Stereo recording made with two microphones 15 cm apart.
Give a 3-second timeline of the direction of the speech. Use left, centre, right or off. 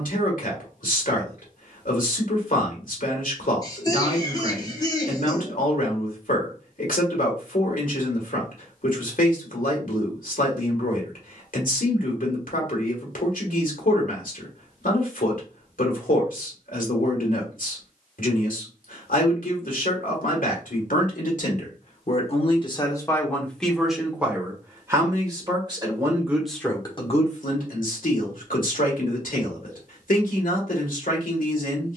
left, left, left, left, left, left, left, left, centre, left, left.